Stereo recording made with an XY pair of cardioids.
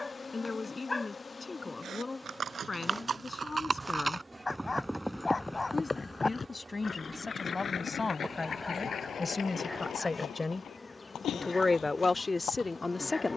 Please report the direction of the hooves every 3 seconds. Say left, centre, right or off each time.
right, centre, left, left, left.